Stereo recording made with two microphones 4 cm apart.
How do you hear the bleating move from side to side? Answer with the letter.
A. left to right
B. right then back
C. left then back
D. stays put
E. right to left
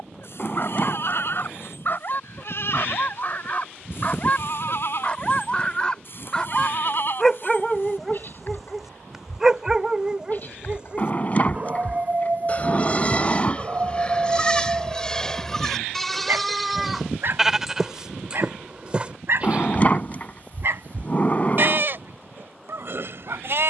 A.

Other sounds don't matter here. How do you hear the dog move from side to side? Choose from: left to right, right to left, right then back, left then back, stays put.
left to right.